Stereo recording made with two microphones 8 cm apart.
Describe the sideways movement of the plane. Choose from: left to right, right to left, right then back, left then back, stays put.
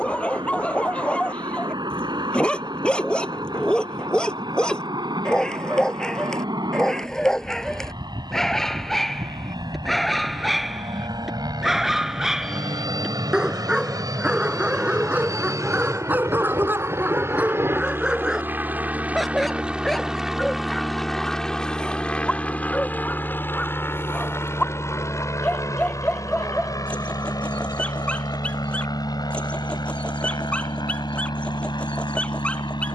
right to left.